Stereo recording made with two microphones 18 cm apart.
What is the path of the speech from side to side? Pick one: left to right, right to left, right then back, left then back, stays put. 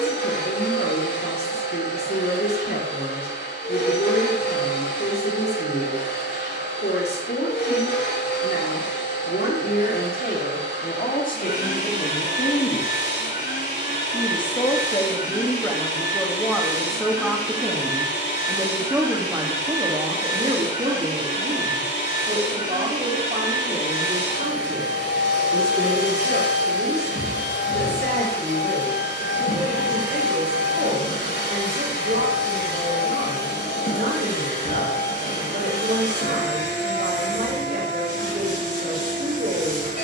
left to right.